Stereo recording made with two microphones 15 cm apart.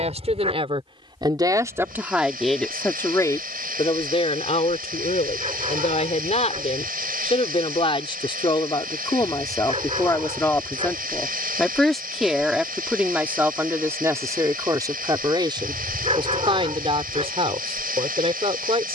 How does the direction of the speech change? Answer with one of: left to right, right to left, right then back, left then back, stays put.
left then back.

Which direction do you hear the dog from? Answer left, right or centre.
right.